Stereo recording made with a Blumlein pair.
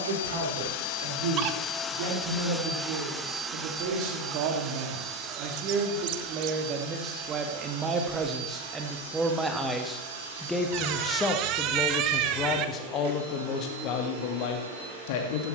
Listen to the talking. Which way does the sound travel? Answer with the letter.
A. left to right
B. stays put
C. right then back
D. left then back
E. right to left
E.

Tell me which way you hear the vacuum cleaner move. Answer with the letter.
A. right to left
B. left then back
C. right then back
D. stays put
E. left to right
E.